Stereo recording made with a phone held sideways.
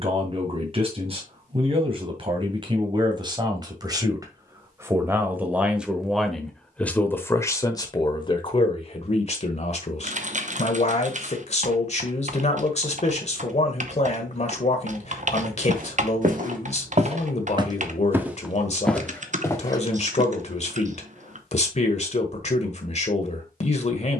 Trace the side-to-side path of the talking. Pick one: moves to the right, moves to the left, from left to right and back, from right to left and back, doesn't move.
moves to the left.